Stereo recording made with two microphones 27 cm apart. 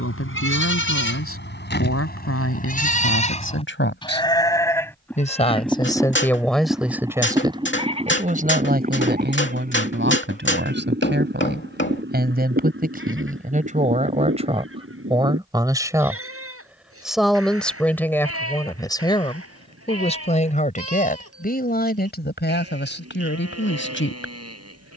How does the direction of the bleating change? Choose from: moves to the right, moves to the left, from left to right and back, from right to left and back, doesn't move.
moves to the right.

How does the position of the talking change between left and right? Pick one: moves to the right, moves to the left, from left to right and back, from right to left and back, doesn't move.
from left to right and back.